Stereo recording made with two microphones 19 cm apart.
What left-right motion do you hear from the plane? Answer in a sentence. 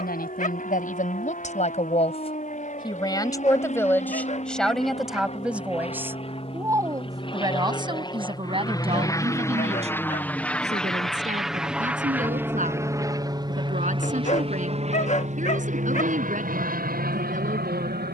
You can hear the plane move to the right.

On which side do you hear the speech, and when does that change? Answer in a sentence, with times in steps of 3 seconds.
You can hear the speech on the left from 0 s, in the centre from 3 s and on the right from 6 s.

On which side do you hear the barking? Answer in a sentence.
You can hear the barking on the left.